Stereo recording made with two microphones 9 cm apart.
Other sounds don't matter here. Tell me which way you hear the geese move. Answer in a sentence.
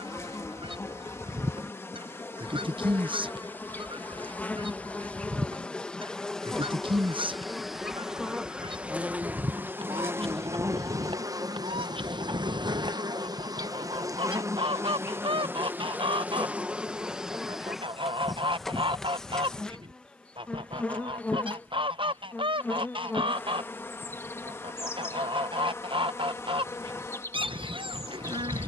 You can hear the geese stay in one place.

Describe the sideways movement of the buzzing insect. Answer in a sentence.
You can hear the buzzing insect move from left to right and back again.